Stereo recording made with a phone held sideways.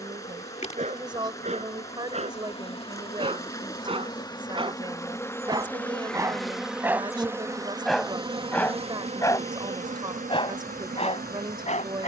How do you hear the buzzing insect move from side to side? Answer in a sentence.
You can hear the buzzing insect move to the right.